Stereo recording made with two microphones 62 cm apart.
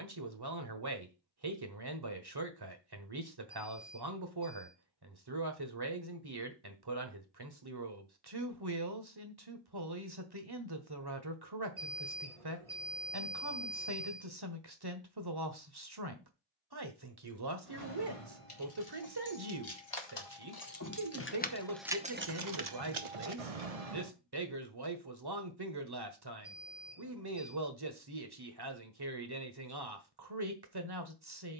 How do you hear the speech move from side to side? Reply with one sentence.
You can hear the speech stay in one place.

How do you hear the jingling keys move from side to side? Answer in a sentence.
In this clip you hear the jingling keys move from left to right.